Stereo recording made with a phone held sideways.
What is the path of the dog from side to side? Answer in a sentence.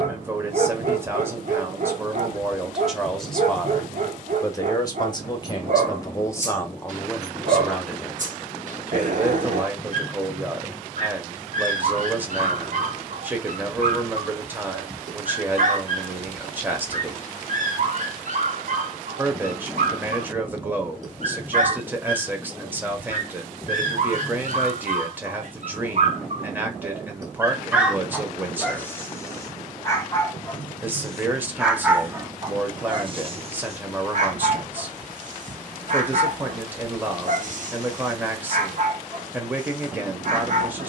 You can hear the dog go left and come back.